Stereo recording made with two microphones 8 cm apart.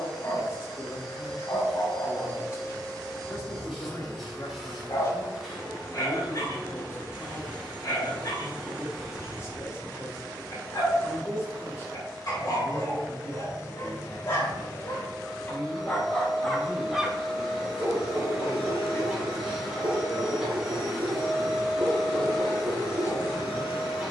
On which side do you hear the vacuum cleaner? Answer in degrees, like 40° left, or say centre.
centre.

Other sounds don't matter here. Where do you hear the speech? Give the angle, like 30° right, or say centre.
40° left.